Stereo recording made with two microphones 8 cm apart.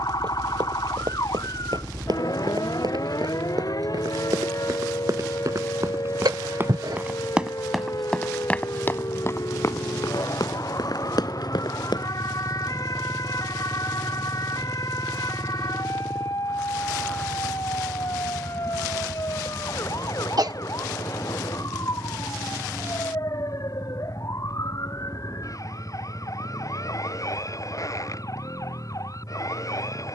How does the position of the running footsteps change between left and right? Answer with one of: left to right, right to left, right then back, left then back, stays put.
right to left.